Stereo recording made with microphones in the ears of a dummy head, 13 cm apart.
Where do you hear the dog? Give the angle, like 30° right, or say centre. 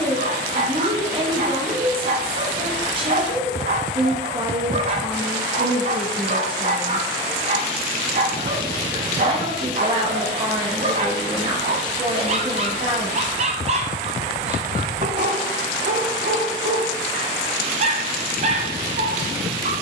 50° right.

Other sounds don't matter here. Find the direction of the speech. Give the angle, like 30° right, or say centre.
40° right.